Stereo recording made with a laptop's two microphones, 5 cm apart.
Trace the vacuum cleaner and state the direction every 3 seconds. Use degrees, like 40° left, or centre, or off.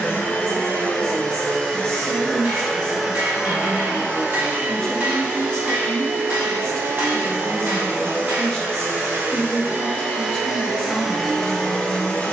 20° left, 30° right, 50° right, 20° right.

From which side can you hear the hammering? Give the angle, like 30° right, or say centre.
50° right.